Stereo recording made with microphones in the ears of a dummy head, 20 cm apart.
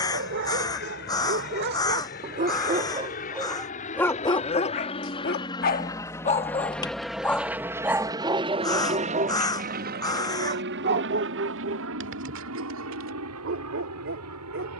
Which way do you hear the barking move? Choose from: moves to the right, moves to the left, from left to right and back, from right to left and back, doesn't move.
from right to left and back.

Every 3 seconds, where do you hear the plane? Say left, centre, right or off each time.
left, left, centre, right, right.